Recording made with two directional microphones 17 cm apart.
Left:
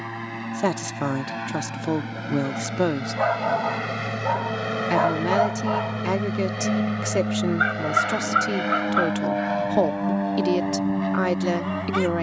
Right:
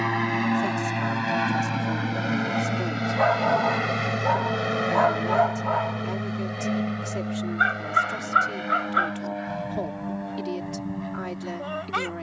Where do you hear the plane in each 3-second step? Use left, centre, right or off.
right, centre, left, left.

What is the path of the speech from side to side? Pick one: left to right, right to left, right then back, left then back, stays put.
stays put.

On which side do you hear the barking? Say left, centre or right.
centre.